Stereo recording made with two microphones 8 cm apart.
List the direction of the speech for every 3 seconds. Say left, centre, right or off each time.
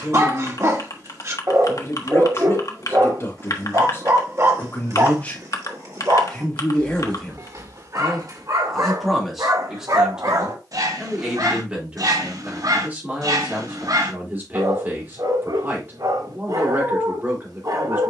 left, left, centre, centre, right, right.